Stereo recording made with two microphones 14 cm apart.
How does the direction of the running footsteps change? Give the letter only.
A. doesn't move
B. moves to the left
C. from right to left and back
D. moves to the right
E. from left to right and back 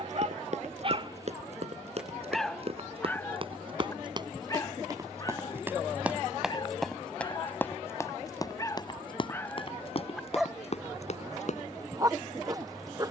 B.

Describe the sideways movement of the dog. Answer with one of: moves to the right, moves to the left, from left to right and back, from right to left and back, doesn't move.
from right to left and back.